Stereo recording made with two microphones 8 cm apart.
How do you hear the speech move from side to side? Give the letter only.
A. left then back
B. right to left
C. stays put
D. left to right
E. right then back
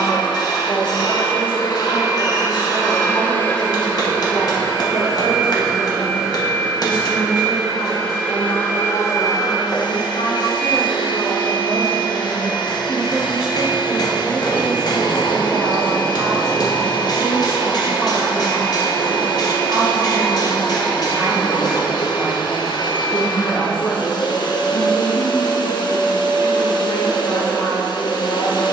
E.